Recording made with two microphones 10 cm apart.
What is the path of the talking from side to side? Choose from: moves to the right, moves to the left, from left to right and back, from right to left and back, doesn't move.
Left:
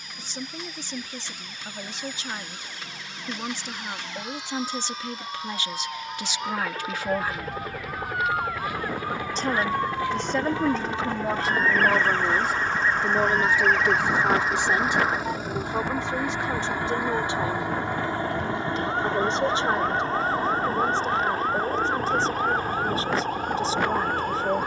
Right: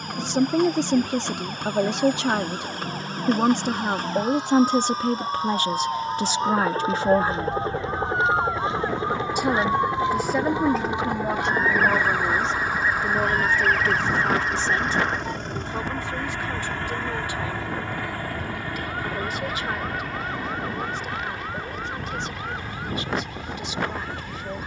moves to the left.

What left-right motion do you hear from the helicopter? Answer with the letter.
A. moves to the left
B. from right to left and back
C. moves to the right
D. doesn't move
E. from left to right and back
A.